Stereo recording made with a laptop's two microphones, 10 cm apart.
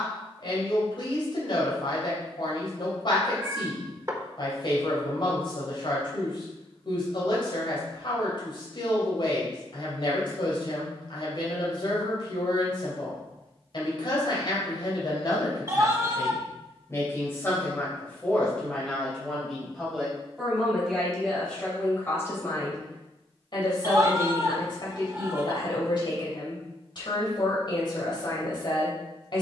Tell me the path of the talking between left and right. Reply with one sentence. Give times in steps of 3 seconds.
You can hear the talking on the left from 0 s, in the centre from 18 s and on the left from 21 s.